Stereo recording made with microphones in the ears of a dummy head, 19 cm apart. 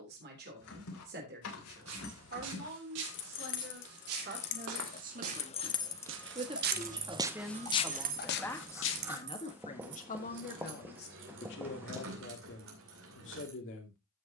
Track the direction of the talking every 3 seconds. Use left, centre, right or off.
right, right, centre, left, left.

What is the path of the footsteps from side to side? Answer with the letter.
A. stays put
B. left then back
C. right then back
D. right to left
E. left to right
D.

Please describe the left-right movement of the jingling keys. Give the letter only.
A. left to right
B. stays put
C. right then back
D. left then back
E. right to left
A.